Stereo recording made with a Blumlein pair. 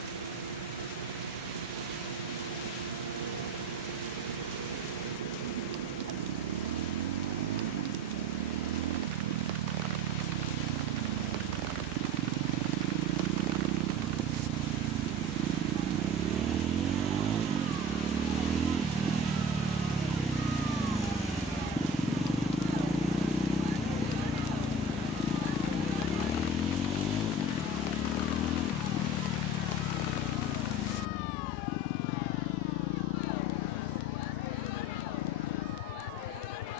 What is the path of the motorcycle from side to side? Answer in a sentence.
You can hear the motorcycle move to the left.